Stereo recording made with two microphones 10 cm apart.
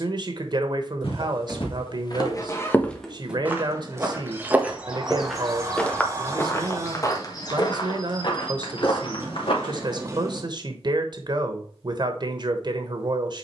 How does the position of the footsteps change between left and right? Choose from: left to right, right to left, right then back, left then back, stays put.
right then back.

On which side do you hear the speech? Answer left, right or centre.
right.